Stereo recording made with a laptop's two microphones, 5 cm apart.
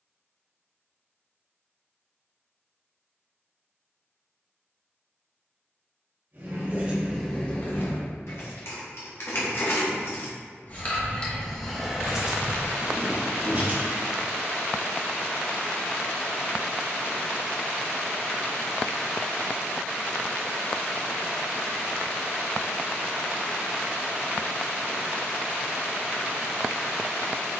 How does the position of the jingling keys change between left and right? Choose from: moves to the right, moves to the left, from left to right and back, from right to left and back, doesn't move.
from right to left and back.